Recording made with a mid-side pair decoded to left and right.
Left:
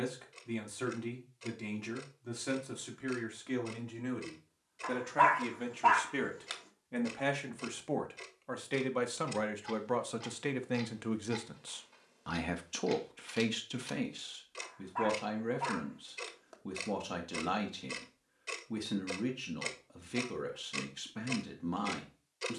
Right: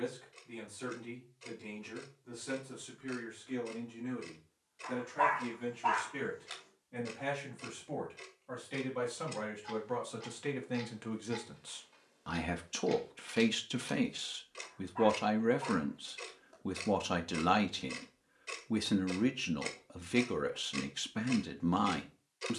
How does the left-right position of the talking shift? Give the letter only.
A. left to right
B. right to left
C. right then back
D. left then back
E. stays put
A.